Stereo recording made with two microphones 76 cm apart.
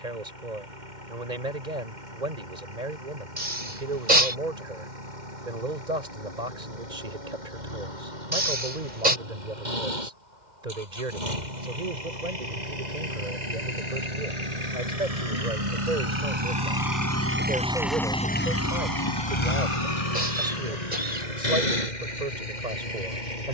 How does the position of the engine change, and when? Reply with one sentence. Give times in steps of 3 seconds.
In this clip you hear the engine on the right from 0 s and on the left from 18 s.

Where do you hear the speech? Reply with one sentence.
You can hear the speech on the right.